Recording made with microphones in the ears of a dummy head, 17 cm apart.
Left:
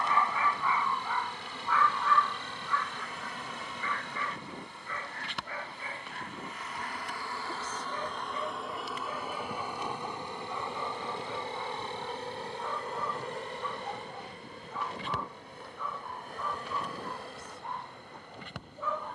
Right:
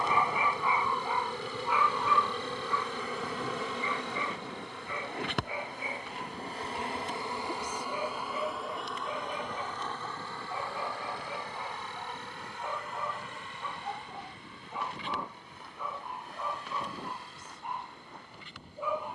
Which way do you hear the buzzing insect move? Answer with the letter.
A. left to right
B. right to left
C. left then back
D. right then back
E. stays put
B.